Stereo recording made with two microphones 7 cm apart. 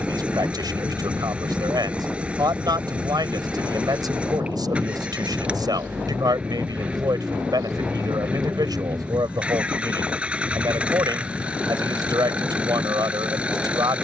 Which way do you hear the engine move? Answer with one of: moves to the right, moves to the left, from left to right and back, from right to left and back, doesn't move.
doesn't move.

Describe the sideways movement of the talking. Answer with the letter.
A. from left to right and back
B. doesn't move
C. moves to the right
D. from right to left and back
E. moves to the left
B.